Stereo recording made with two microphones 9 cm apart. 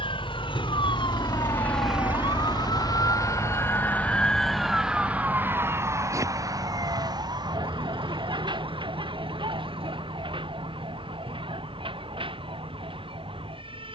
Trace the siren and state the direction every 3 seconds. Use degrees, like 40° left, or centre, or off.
60° left, centre, 50° right, 60° right, 70° right.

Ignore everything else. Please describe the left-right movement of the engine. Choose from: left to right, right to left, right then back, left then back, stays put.
left to right.